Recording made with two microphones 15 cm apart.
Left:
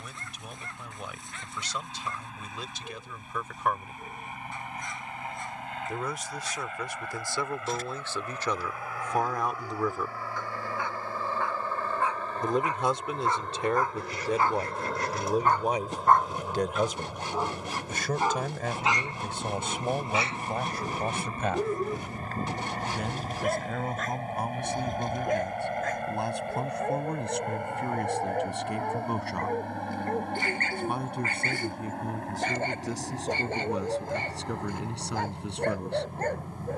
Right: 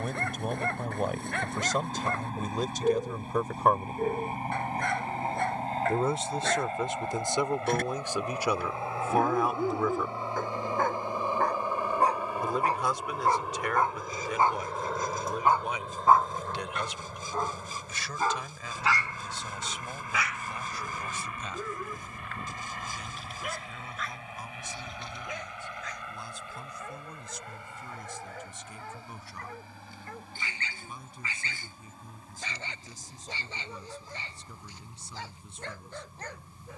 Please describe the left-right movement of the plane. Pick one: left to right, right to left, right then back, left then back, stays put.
right to left.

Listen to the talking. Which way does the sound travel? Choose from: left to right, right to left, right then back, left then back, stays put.
right to left.